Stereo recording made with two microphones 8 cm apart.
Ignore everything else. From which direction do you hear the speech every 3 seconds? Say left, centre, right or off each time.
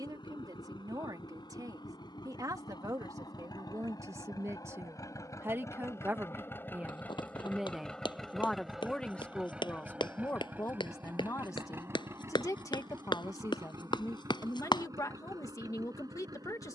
right, right, centre, left, left, left.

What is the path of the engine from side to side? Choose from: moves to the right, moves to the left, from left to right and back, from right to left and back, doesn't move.
moves to the right.